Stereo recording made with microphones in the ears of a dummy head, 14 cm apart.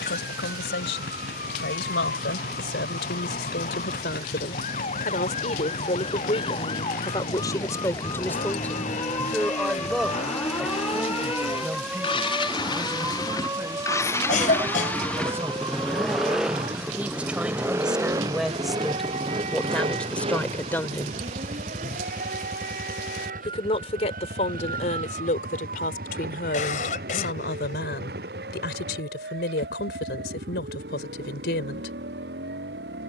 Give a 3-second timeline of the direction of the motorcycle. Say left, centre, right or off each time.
left, left, left, left, left, centre, right, right, right, right, right.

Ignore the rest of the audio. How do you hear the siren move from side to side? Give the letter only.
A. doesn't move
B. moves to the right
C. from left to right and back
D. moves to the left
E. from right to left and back
B.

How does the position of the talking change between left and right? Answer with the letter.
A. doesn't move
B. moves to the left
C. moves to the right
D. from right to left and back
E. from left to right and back
E.